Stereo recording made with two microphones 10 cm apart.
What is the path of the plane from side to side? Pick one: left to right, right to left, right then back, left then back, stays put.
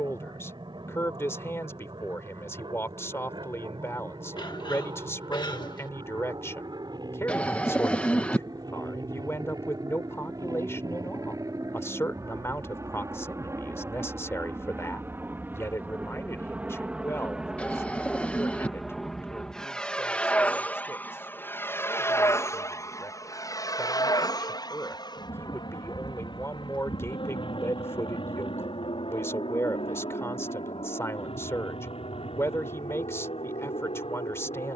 right to left.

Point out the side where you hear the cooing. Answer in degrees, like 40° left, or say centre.
10° left.